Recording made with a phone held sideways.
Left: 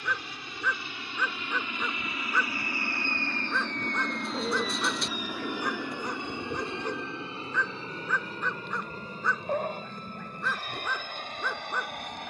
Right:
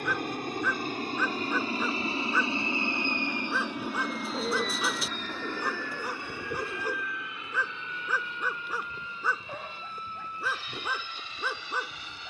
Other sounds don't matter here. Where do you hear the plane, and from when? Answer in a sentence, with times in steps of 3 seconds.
In this clip you hear the plane on the right from 0 s, in the centre from 3 s and on the left from 6 s.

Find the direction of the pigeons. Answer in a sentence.
In this clip you hear the pigeons in the centre.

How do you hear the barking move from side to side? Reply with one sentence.
In this clip you hear the barking stay in one place.